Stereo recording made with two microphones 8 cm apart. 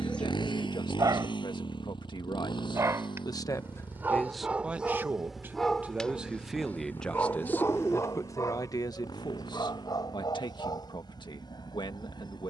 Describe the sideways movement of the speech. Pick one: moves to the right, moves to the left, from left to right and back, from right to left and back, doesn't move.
from left to right and back.